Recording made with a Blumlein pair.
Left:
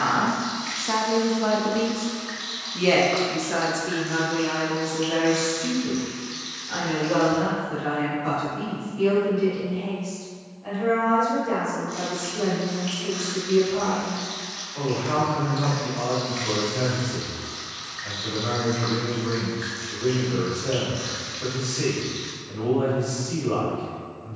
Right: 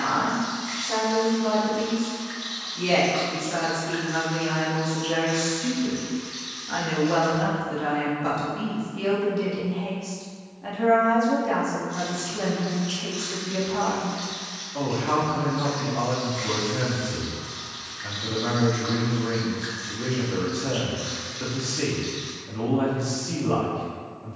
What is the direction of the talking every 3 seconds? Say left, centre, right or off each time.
left, centre, right, right, right, right, right, right.